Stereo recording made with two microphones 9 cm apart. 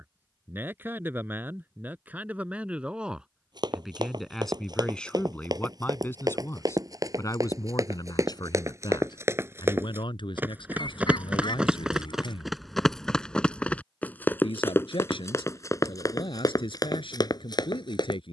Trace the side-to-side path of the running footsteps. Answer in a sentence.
In this clip you hear the running footsteps move to the left.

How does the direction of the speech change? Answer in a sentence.
You can hear the speech travel towards the left.